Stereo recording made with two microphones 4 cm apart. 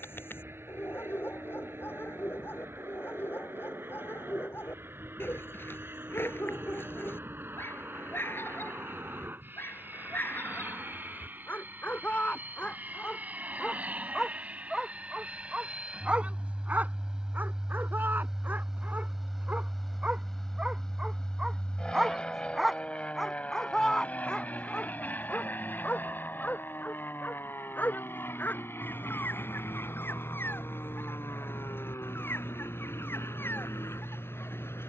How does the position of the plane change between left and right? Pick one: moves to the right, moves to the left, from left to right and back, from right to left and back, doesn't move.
moves to the left.